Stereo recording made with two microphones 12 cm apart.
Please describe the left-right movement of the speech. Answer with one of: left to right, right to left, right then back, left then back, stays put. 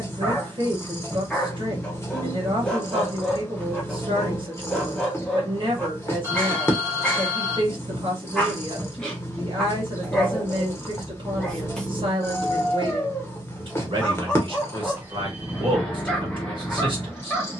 stays put.